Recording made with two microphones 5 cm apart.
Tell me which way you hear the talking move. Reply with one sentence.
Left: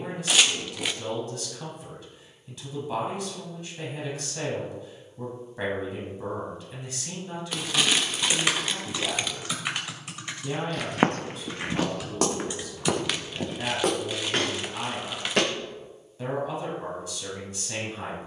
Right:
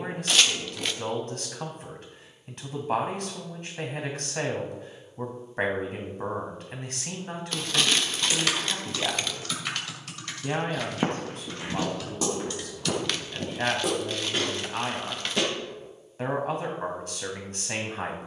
You can hear the talking stay in one place.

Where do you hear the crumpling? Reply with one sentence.
In this clip you hear the crumpling in the centre.